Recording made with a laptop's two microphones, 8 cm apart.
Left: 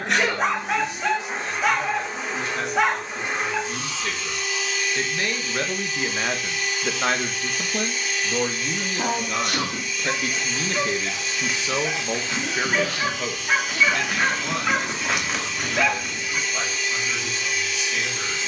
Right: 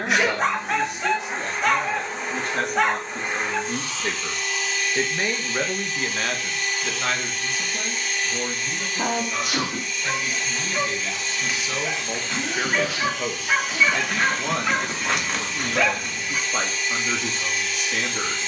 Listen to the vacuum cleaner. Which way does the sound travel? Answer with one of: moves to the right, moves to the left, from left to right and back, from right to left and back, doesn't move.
doesn't move.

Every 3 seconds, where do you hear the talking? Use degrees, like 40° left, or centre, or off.
50° right, 20° right, 30° left, 50° left, 10° right, 50° right.